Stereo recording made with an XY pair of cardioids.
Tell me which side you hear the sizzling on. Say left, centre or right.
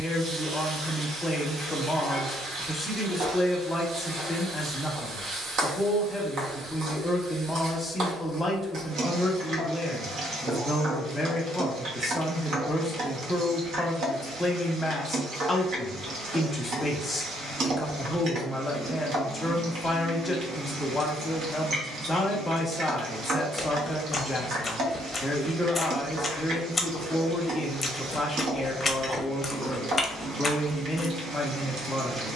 right.